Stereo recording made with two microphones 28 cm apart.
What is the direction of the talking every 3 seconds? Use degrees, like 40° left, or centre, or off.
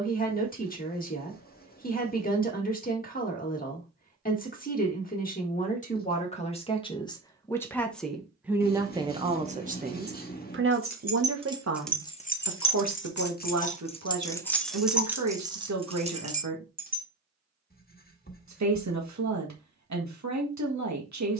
30° left, 30° left, 10° left, 40° right, 70° right, 80° right, 80° right.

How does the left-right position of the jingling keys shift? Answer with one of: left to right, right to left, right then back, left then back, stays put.
left then back.